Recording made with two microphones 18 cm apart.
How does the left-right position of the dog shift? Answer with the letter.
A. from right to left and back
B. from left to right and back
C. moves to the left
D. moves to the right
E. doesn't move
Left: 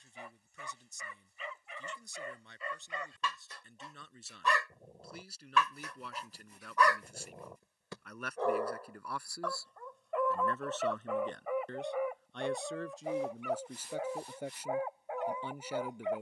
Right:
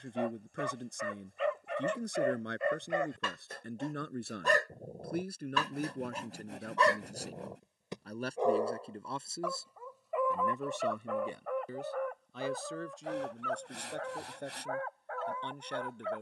C.